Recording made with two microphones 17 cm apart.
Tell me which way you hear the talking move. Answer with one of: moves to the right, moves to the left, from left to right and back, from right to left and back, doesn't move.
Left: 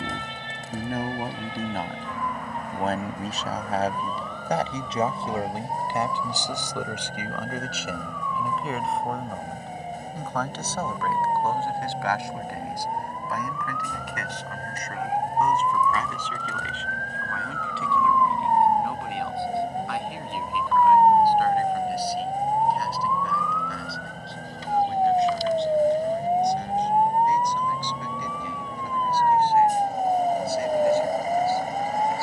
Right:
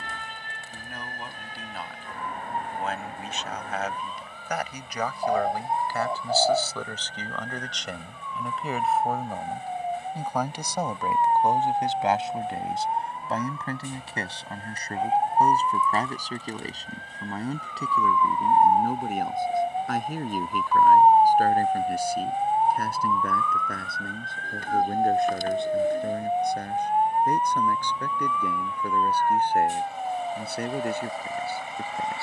moves to the right.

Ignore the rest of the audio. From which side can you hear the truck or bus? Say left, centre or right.
left.